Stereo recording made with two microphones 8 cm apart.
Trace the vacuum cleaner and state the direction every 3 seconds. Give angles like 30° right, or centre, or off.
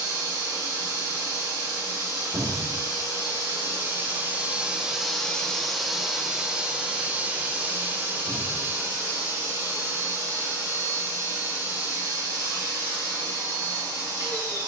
40° right, 20° right, 20° right, 40° right, 40° right.